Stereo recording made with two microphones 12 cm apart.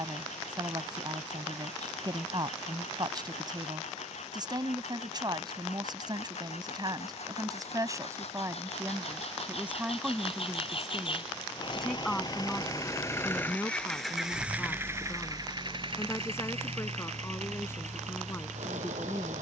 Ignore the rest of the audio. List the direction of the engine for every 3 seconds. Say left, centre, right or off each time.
left, left, left, left, centre, right, right.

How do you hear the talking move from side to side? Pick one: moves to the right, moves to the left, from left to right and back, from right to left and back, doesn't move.
moves to the left.